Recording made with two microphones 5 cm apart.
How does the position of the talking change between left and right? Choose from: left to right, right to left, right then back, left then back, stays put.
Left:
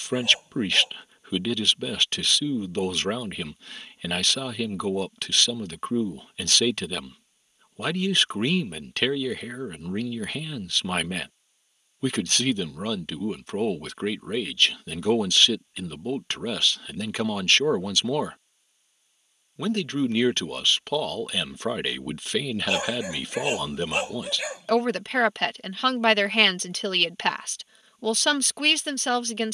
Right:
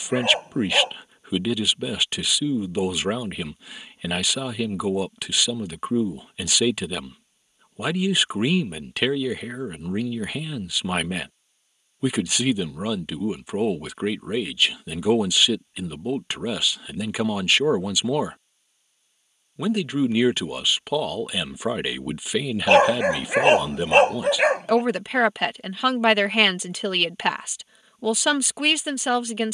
stays put.